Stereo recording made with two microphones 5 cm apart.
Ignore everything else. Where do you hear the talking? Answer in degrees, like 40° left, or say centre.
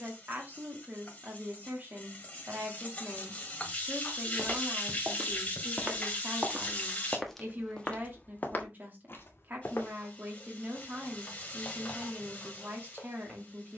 40° right.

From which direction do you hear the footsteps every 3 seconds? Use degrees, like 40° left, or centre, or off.
off, 50° right, 10° left, 50° left, off.